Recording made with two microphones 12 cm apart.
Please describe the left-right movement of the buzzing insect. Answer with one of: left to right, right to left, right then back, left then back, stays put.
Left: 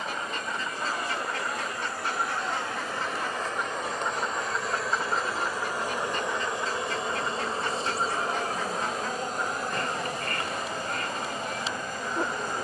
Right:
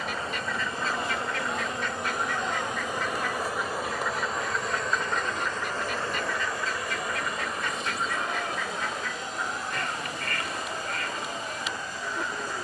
right to left.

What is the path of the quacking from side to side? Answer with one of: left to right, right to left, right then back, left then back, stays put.
stays put.